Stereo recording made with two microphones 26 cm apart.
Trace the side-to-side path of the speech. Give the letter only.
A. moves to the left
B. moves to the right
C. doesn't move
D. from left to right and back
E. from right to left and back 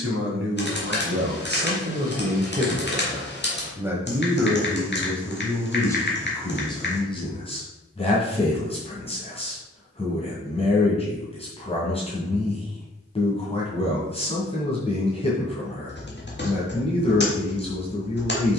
A.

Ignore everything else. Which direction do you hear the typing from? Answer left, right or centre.
left.